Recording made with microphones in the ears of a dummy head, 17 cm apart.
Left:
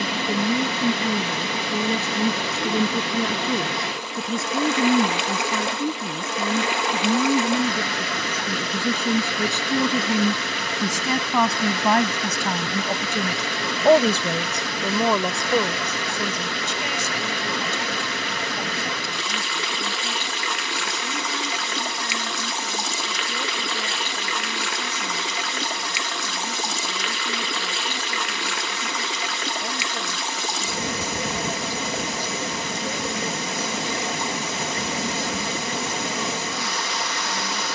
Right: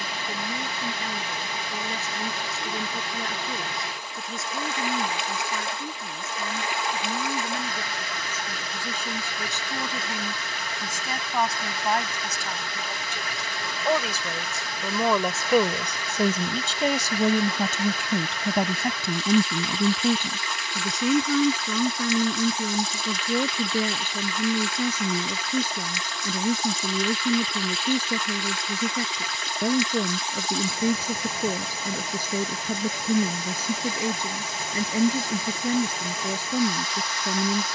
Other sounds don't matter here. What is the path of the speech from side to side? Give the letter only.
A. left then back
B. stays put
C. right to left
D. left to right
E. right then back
D.